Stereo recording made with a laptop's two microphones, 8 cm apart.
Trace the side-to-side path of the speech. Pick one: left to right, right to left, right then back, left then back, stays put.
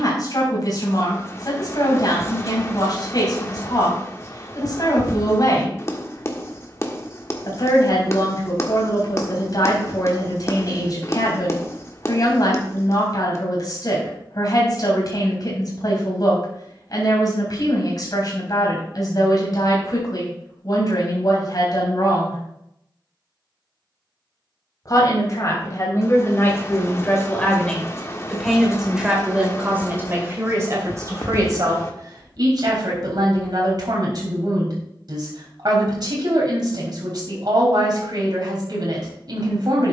left to right.